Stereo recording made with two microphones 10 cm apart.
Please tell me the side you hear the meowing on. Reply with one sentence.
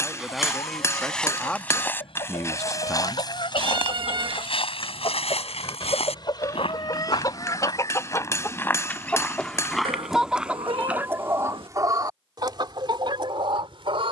In this clip you hear the meowing on the right.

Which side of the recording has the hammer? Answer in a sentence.
You can hear the hammer on the left.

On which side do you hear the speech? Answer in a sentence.
In this clip you hear the speech in the centre.